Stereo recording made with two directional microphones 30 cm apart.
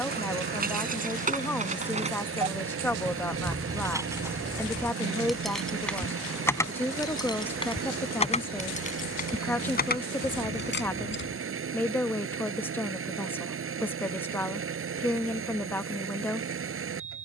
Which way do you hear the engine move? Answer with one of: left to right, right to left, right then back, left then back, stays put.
stays put.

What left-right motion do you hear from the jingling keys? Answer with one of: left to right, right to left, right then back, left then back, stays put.
right to left.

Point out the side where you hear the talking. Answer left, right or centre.
centre.